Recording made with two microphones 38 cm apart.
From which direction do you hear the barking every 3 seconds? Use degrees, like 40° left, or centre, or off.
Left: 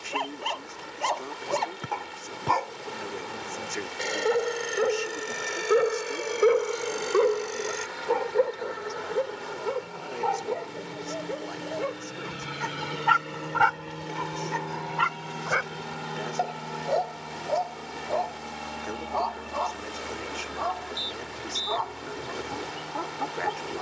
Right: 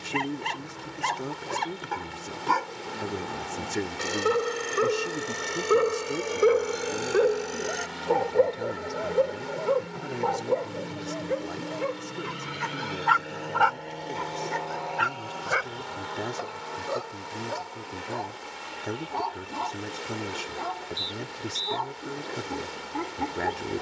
30° right, 10° right, 10° left, 50° left, 40° left, 10° right, 30° right, 30° right.